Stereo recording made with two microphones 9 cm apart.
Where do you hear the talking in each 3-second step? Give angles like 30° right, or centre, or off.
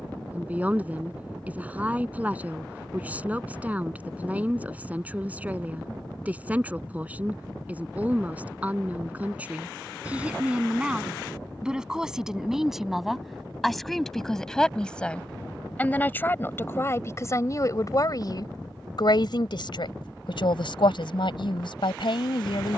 20° right, 20° right, 20° right, 10° right, centre, 30° left, 60° left, 70° left.